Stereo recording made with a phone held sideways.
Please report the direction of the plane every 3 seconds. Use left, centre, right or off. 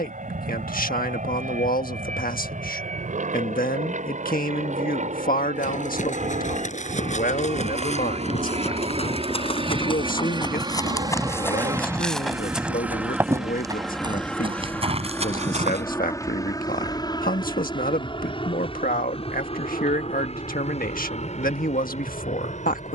right, right, right, right, centre, left, left, left.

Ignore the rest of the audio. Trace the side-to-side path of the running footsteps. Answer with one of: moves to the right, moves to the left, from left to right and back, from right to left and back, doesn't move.
moves to the right.